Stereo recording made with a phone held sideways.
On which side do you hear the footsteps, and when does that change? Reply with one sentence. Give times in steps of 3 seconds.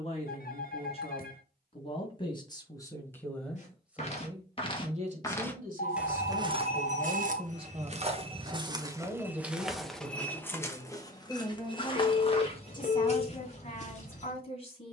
In this clip you hear the footsteps not at all from 0 s, on the left from 3 s, on the right from 6 s, in the centre from 9 s and on the left from 12 s.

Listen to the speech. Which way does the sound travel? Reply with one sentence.
In this clip you hear the speech move from left to right and back again.